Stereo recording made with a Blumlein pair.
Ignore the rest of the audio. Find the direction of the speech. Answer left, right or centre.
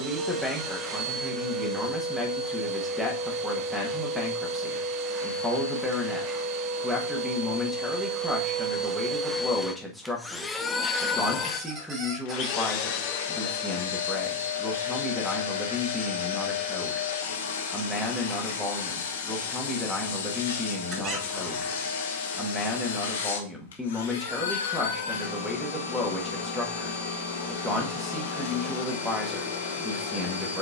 centre.